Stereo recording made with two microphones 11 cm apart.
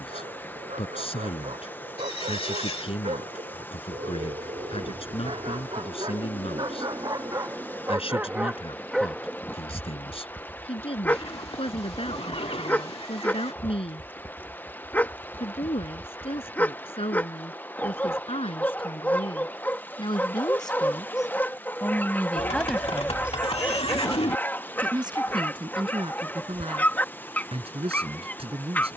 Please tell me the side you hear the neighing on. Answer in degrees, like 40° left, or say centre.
60° left.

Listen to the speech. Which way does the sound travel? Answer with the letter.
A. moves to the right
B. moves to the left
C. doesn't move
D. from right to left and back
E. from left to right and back
A.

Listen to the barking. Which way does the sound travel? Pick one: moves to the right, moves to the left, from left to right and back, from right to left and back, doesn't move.
moves to the left.